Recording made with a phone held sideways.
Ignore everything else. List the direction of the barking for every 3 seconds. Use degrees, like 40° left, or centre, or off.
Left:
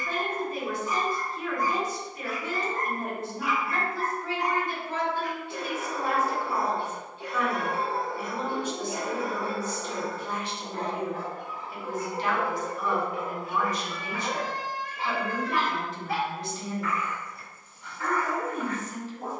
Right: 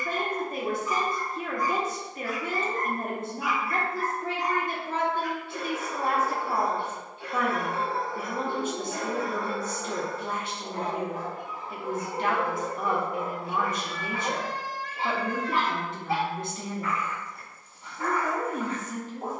60° left, 50° left, 30° left, centre, 30° right, 30° right, 30° right.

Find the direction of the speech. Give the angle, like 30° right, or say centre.
50° right.